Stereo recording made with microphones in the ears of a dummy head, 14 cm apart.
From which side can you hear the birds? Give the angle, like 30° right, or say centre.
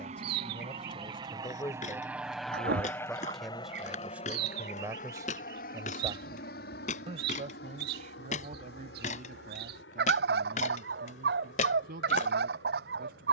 80° right.